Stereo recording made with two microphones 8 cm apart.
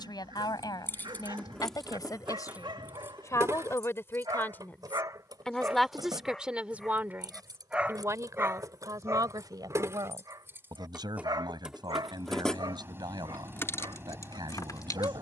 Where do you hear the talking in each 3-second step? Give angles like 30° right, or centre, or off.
50° left, 20° left, 30° right, 60° right, 70° right.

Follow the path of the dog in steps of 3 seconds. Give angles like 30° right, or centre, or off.
80° right, 60° right, 10° right, 50° right, 70° right.